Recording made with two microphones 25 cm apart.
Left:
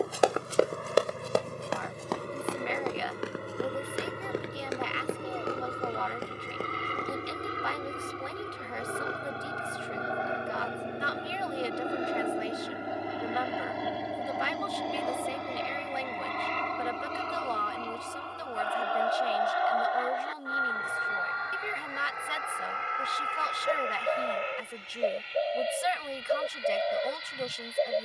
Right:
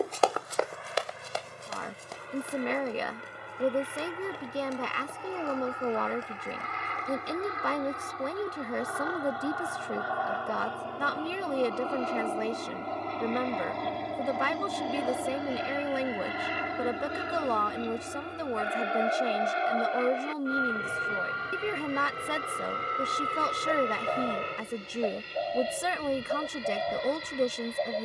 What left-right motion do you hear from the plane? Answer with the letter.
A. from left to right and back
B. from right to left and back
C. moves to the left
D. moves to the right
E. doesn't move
D.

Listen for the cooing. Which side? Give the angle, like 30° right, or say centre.
40° left.